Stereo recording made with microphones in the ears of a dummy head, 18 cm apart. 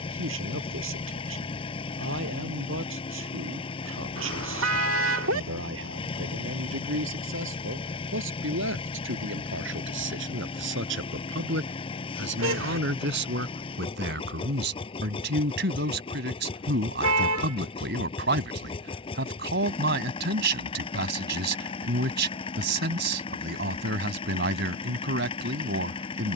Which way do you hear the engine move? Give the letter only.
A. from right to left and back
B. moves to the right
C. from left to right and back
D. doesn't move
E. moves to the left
D.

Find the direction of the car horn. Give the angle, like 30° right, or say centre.
70° right.